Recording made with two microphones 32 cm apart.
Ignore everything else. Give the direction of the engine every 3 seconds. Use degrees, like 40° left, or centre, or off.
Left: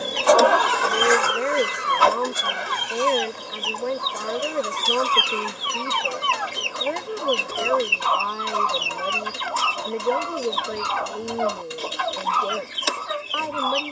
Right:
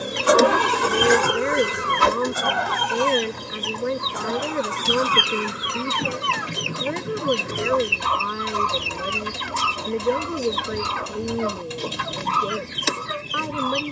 50° right, 70° right, 70° right, 70° right, 70° right.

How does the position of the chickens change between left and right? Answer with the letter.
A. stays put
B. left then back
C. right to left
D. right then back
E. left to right
A.